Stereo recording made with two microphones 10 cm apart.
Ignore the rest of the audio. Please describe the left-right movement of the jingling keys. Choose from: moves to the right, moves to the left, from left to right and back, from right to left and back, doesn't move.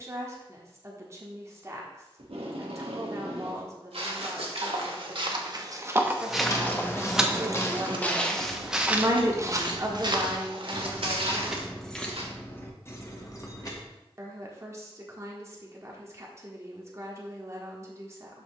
from left to right and back.